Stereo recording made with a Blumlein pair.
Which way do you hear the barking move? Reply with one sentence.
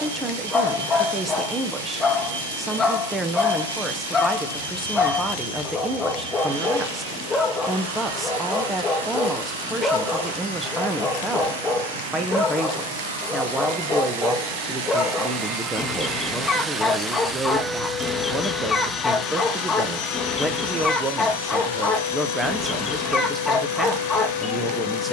In this clip you hear the barking stay in one place.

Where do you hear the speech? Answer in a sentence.
In this clip you hear the speech in the centre.